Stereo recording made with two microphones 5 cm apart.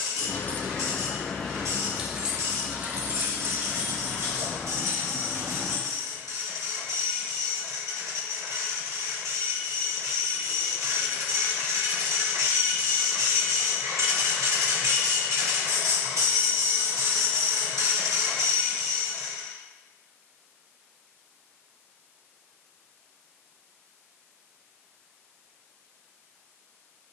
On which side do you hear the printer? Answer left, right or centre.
right.